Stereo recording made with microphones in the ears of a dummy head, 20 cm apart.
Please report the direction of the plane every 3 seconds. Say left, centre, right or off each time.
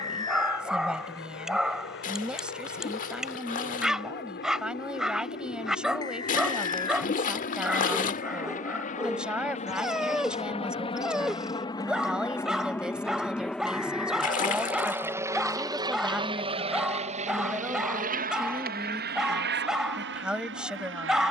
left, left, left, left, centre, right, right.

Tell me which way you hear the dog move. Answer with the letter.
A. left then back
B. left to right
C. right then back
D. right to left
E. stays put
E.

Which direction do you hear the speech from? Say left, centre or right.
centre.